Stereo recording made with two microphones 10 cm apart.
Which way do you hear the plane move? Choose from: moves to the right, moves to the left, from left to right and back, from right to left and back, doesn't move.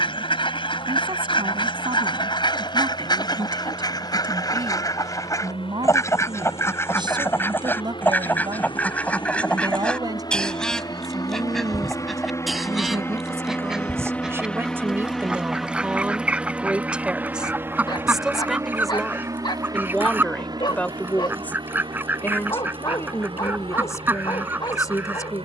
moves to the right.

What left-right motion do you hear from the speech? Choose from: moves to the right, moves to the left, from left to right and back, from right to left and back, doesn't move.
moves to the left.